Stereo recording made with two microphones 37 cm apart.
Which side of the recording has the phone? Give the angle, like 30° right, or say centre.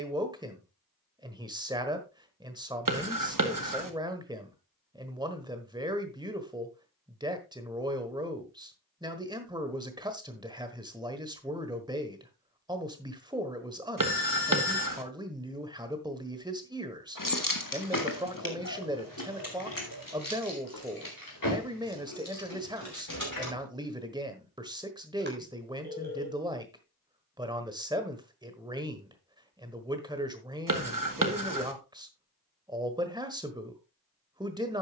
30° right.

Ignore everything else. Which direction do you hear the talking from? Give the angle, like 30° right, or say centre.
10° right.